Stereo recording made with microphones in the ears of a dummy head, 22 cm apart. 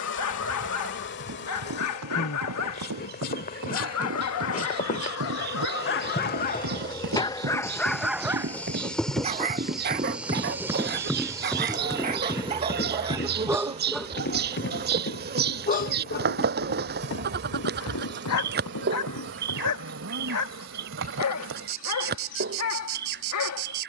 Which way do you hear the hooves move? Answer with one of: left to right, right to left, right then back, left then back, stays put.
right to left.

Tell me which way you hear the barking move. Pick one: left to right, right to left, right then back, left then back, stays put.
right then back.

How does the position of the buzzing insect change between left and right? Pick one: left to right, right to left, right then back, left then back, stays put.
left to right.